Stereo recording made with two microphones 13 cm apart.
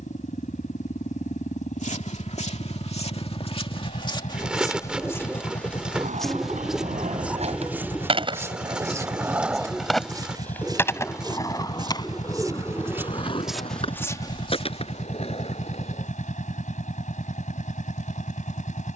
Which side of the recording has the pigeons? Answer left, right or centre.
centre.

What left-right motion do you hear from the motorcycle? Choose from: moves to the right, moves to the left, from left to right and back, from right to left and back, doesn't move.
doesn't move.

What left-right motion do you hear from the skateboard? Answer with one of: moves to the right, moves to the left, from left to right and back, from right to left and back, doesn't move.
moves to the left.